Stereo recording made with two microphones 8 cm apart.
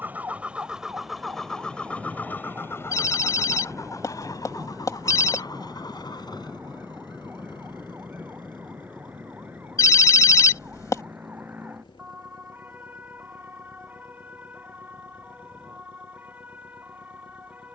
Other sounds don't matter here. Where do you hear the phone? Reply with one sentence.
In this clip you hear the phone on the left.